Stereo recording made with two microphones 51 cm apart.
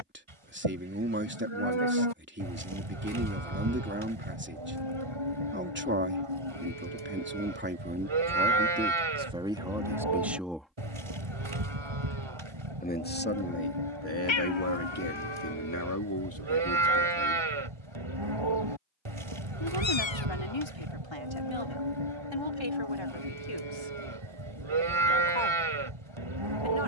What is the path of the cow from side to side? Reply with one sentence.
In this clip you hear the cow stay in one place.